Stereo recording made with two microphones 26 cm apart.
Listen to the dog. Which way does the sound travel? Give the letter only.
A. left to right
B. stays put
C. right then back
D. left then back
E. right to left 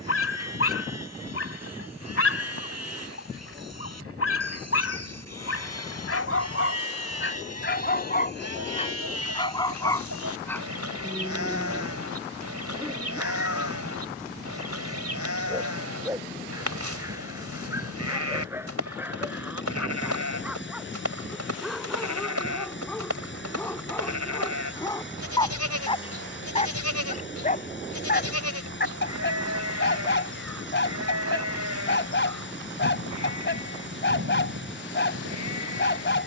C.